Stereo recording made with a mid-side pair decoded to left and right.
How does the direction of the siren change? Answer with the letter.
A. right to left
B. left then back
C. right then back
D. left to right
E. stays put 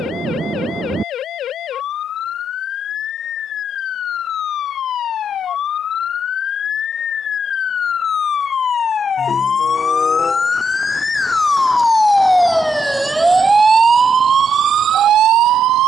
D.